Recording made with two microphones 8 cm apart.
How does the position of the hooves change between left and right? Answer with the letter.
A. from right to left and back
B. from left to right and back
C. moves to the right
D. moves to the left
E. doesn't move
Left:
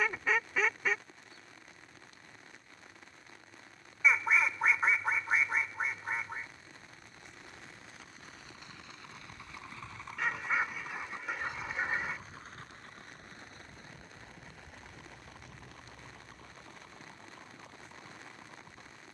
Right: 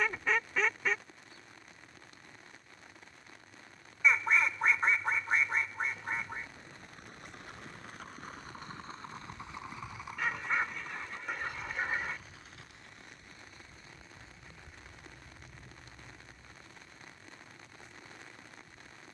D.